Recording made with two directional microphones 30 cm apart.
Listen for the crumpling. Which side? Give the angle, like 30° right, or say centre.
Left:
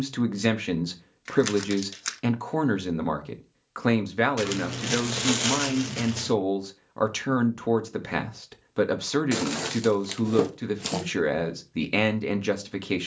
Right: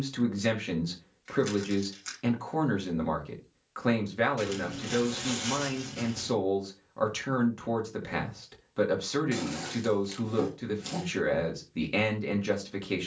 60° left.